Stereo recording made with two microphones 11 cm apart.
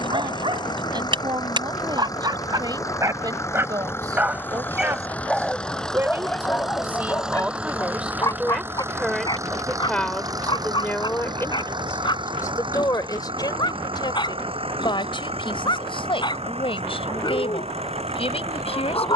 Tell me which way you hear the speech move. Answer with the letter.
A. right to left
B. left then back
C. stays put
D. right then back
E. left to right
A.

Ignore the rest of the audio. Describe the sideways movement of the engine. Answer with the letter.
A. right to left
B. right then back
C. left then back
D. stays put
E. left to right
E.